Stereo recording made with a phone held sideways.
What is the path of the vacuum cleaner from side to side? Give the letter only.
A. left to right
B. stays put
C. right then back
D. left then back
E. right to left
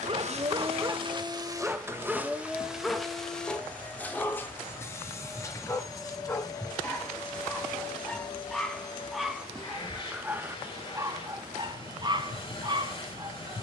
E.